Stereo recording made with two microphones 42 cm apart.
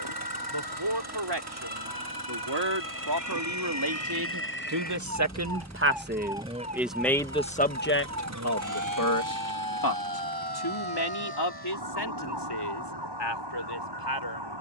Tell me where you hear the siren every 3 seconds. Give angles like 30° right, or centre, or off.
60° left, 30° left, 30° right, 60° right, 70° right.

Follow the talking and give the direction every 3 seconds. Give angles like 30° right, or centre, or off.
70° right, 50° right, 10° left, 60° left, 70° left.